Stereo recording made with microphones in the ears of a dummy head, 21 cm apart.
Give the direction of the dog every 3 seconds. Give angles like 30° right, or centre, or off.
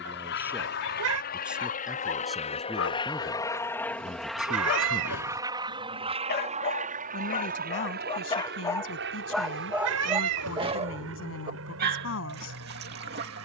60° left, 50° left, 30° left, 20° right, 50° right.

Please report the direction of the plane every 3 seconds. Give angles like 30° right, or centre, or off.
40° left, centre, 40° right, 50° right, 60° right.